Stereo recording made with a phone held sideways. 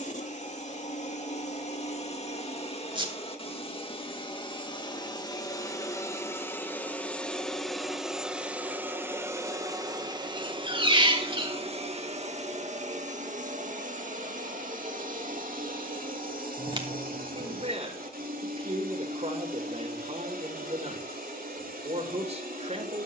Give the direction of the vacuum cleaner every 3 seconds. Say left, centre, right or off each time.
left, left, centre, right, right, right, right, right.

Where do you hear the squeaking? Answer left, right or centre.
right.